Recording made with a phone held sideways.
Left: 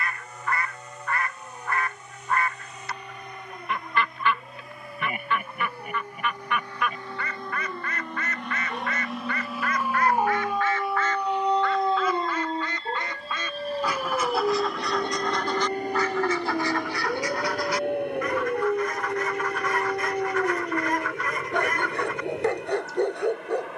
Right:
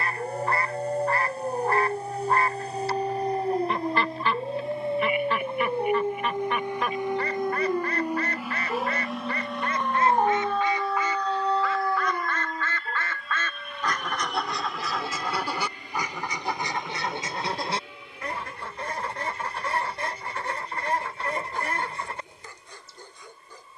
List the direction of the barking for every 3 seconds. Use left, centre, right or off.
right, right, right, centre, left, left, left, left.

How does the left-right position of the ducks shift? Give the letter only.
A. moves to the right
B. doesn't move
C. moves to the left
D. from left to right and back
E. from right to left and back
E.